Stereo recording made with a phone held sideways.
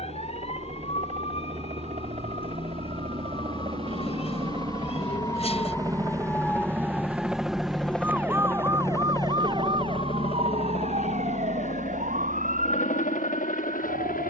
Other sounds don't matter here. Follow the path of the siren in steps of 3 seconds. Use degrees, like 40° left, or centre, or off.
40° left, 30° left, centre, 50° right, 70° right.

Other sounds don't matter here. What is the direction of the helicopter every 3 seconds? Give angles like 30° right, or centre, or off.
50° right, 40° right, centre, 40° left, 60° left.